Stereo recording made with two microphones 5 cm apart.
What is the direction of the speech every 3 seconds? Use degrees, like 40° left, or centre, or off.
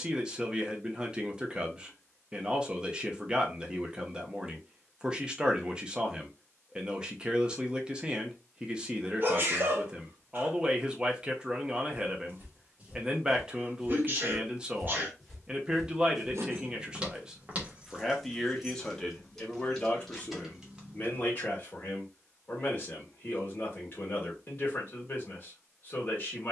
20° right, 20° right, 20° right, 20° right, 20° right, 10° right, 20° left, 30° left, 30° left.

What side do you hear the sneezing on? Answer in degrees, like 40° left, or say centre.
40° right.